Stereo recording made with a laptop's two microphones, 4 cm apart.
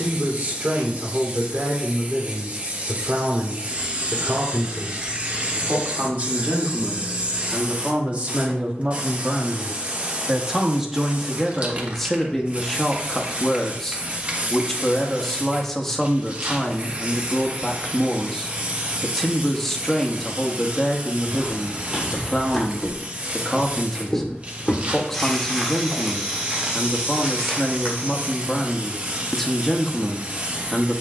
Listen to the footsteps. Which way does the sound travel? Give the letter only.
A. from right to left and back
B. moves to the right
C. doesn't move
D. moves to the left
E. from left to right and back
A.